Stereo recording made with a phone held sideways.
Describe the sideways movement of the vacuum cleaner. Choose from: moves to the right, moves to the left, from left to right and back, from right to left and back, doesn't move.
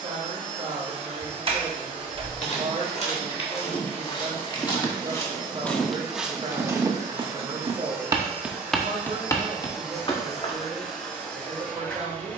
moves to the left.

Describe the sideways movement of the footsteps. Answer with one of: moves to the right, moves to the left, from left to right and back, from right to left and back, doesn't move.
from left to right and back.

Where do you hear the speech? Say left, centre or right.
right.